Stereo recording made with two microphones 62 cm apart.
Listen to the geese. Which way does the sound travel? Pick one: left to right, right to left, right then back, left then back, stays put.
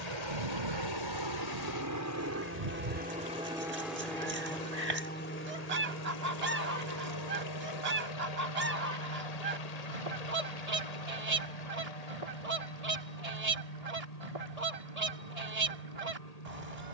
stays put.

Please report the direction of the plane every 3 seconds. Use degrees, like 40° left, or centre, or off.
30° right, 10° left, 30° left, 50° left, 60° left, 60° left.